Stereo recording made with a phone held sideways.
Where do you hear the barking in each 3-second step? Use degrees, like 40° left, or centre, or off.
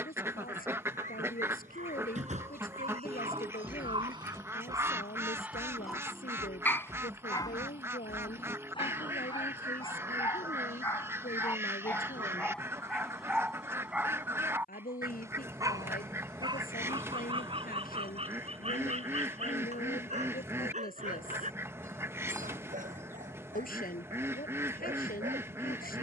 60° right, 30° right, 30° left, 20° left, centre, 30° right, 50° right, 60° right, 60° right.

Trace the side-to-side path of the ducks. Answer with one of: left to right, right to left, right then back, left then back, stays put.
stays put.